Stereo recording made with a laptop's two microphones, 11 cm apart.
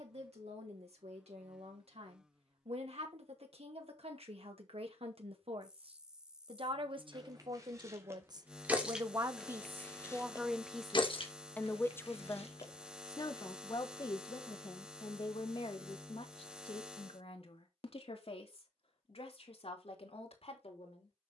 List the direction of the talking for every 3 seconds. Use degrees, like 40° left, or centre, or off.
80° right, 70° right, 50° right, 10° right, 40° left, 60° left, 70° left.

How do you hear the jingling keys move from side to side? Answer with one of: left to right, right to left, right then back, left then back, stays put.
right to left.